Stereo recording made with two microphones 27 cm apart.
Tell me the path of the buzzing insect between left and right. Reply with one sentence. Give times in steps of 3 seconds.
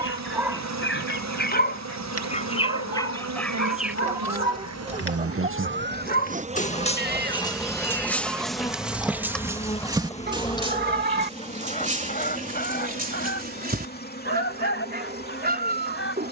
You can hear the buzzing insect on the right from 0 s, in the centre from 6 s and on the left from 9 s.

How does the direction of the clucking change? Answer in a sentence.
You can hear the clucking move from left to right and back again.